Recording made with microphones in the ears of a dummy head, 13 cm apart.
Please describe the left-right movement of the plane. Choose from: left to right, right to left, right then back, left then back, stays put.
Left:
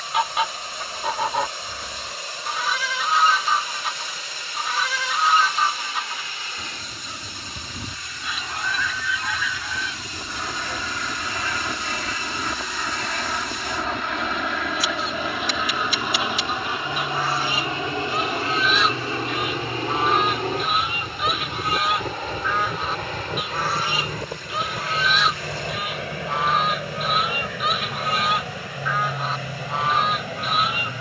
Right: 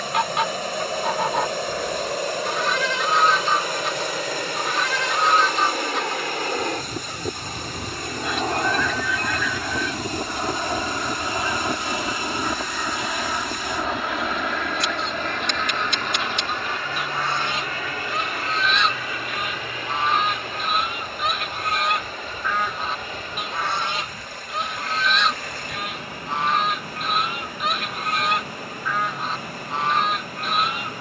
right to left.